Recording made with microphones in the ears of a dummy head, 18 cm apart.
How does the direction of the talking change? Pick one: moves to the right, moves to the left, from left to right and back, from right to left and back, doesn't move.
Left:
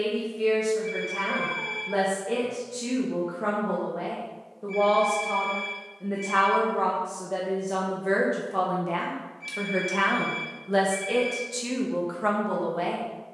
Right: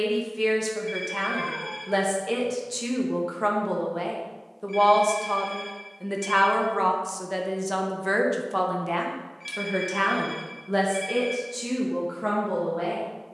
moves to the left.